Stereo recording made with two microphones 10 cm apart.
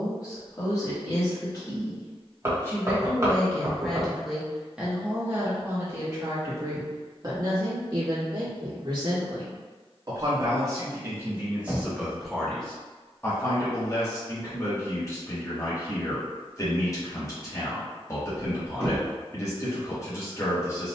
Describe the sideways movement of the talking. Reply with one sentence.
In this clip you hear the talking move from left to right and back again.